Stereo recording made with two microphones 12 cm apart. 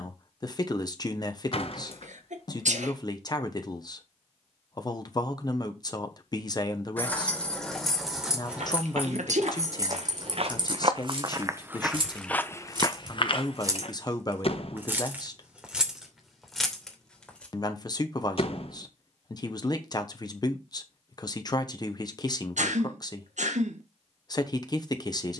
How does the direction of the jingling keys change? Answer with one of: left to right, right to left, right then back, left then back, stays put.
right then back.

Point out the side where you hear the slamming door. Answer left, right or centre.
left.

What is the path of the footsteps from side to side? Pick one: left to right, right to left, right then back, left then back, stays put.
right to left.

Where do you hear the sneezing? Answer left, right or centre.
right.